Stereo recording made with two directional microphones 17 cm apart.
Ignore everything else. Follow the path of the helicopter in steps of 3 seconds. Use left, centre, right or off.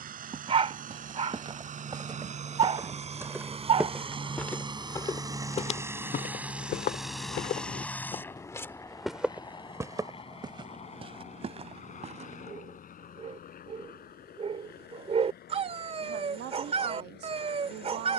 right, right, centre, left, left, left.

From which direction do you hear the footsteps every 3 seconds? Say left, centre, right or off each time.
right, centre, left, right, right, off.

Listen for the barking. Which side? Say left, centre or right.
right.